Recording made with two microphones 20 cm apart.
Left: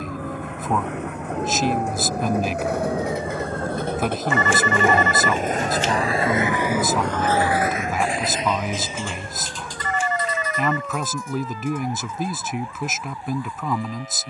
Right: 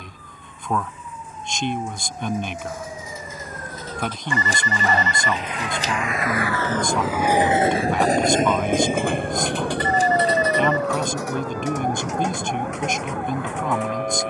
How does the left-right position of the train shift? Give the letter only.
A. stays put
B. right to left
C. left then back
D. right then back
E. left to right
E.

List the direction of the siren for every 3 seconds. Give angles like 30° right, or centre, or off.
40° left, 20° left, 10° right, 40° right, 60° right.